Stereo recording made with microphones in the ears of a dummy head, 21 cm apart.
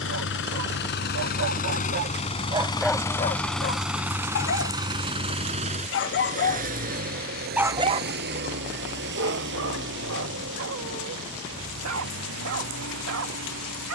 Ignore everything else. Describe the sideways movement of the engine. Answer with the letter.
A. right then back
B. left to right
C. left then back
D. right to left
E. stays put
B.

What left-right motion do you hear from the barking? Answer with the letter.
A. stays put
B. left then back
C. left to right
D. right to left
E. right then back
B.